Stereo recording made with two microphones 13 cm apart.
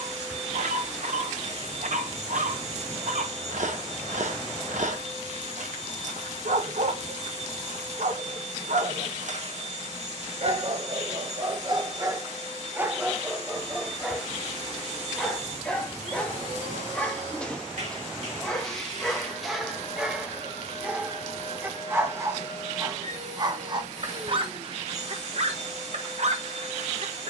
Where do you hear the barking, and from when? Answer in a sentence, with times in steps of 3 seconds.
In this clip you hear the barking on the right from 0 s, in the centre from 12 s and on the right from 21 s.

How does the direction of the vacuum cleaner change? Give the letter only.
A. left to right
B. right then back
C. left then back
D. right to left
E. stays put
E.